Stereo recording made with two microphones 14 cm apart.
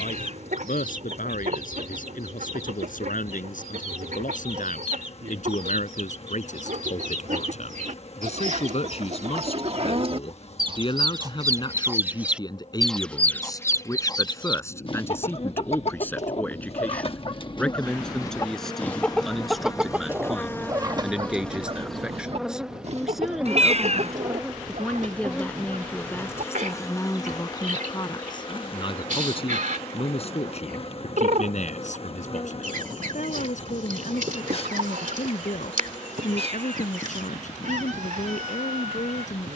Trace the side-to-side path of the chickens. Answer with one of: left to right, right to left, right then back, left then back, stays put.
left then back.